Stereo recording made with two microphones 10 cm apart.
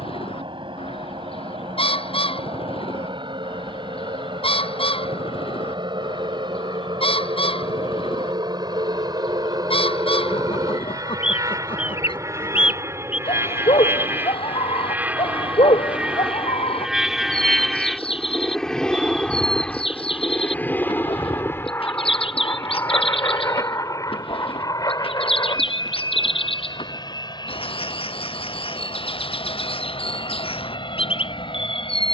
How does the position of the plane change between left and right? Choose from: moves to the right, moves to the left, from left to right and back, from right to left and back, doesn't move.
moves to the left.